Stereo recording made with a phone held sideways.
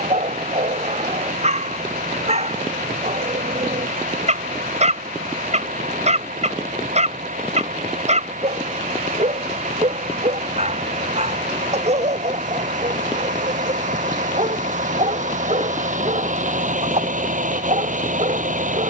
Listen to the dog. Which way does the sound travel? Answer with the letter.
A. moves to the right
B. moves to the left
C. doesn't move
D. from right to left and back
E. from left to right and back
C.